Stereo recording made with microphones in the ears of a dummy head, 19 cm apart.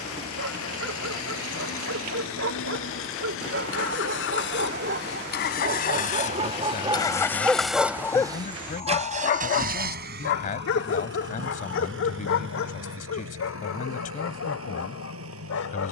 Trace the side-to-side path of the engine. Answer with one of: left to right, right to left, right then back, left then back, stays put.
left to right.